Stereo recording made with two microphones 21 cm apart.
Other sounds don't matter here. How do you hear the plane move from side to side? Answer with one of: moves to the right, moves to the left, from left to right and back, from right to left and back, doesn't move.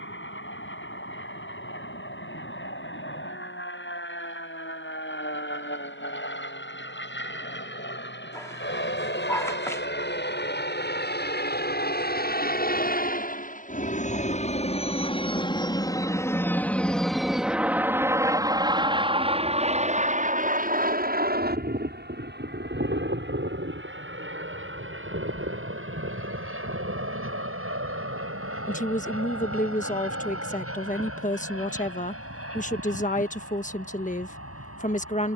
moves to the right.